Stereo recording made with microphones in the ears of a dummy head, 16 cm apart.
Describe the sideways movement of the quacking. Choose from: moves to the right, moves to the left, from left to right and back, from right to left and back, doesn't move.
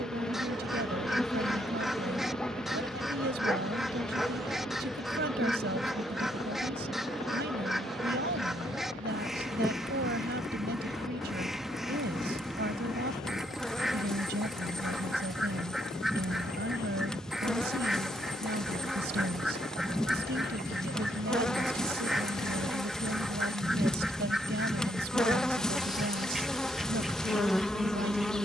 doesn't move.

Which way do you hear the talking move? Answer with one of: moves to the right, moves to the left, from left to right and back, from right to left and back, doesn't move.
doesn't move.